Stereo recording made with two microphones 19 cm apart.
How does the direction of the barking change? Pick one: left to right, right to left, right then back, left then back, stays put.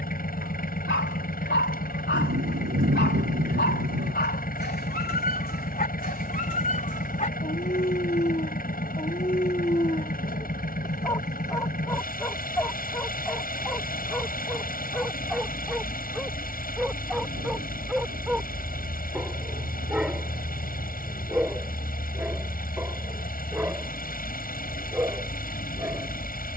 left to right.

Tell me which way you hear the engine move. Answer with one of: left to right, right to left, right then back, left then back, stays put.
stays put.